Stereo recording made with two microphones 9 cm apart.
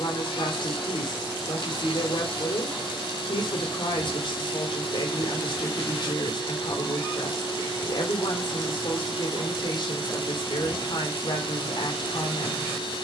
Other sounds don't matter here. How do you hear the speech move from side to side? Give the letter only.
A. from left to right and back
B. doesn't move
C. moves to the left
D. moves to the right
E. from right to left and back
B.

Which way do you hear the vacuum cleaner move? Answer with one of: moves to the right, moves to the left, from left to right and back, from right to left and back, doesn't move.
doesn't move.